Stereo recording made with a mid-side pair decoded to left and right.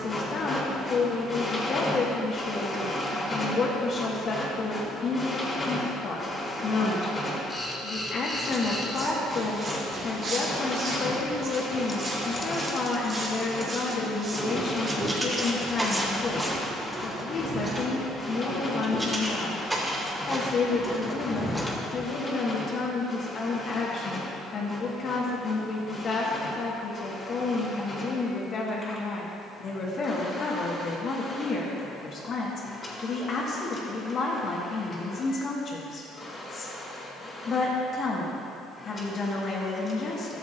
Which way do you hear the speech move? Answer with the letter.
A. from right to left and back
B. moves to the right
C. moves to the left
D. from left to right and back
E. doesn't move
E.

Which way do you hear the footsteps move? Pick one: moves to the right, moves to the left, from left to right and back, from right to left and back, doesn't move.
from left to right and back.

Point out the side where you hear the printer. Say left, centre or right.
left.